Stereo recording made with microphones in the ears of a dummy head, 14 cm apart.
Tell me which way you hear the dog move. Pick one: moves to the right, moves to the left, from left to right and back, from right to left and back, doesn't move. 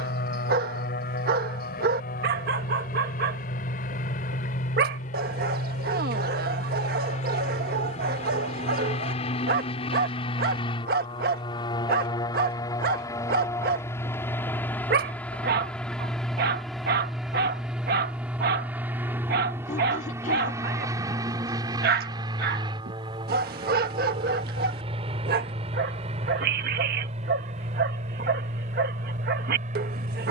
doesn't move.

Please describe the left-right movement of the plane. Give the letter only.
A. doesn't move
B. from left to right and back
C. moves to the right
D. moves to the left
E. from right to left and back
C.